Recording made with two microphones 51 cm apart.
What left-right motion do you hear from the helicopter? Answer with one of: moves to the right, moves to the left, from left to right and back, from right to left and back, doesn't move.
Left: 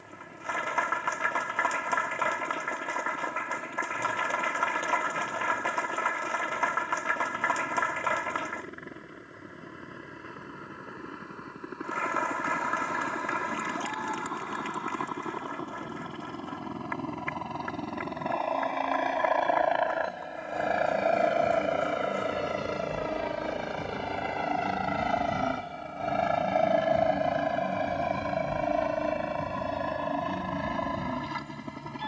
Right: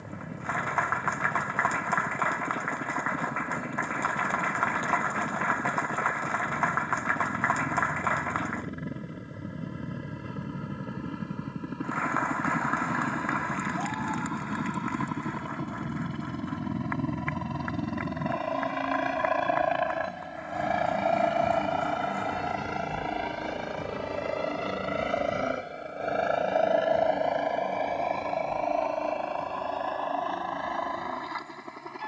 moves to the left.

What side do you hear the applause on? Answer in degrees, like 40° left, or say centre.
50° left.